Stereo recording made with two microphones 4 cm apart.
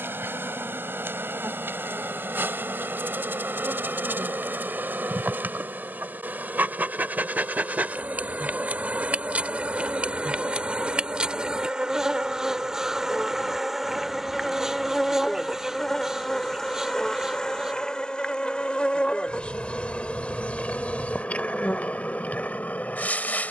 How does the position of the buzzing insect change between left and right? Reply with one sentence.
You can hear the buzzing insect travel towards the left.